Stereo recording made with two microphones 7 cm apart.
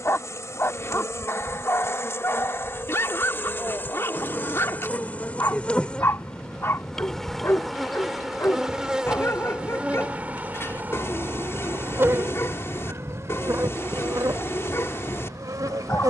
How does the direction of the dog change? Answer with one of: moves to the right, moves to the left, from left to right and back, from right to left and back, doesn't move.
doesn't move.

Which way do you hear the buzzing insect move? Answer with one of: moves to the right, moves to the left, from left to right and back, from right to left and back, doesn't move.
moves to the right.